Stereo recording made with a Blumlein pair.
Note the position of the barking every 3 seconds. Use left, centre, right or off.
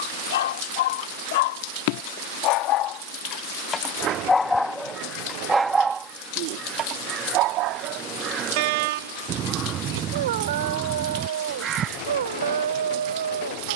left, centre, right, right, right.